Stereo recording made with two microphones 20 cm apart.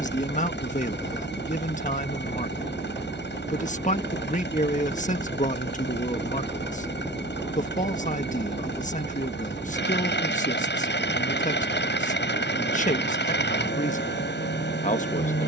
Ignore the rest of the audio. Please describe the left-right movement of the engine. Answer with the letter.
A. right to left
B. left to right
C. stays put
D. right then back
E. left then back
C.